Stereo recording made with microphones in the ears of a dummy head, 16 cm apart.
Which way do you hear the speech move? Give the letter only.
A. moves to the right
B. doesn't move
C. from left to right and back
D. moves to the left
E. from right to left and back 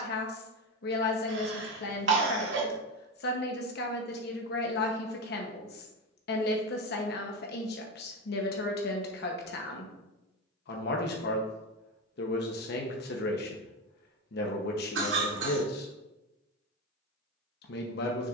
B.